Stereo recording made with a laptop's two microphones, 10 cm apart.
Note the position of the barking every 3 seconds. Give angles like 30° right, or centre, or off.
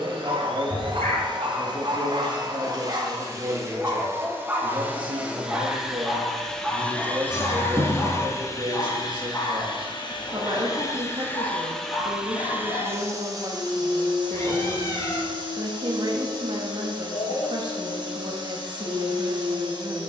50° right, 20° right, 10° left, 30° left, 40° left, 50° left, 50° left.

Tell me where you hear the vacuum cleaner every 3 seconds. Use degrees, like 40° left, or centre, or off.
40° right, 20° right, 20° left, 30° left, 30° right, 40° right, 40° right.